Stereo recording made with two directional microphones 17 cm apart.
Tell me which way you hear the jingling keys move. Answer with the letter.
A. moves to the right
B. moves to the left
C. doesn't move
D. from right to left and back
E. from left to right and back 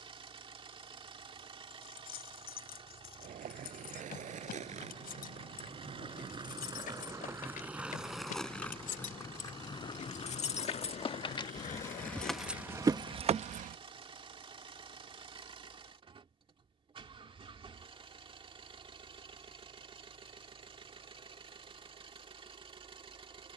A.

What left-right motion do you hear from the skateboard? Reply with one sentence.
You can hear the skateboard go from the right side to the left.